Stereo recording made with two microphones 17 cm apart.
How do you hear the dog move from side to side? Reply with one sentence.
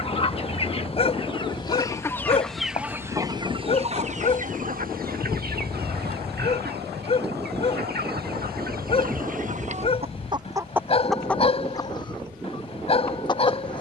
In this clip you hear the dog stay in one place.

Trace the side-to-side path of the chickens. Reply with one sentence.
In this clip you hear the chickens move from left to right and back again.